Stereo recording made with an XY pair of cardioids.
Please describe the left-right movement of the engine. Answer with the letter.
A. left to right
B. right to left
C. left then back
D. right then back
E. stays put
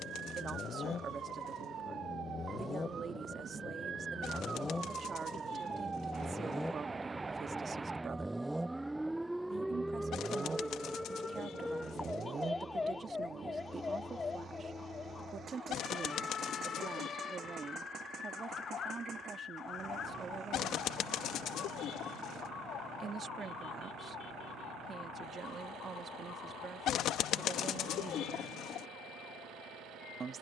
A.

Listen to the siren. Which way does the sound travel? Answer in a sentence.
You can hear the siren move from right to left.